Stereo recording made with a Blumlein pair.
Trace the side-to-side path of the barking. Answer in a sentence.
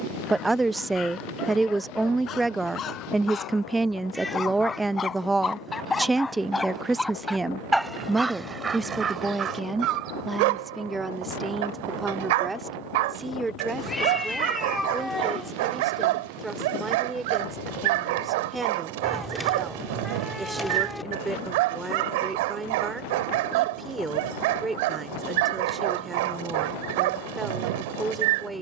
You can hear the barking move to the right.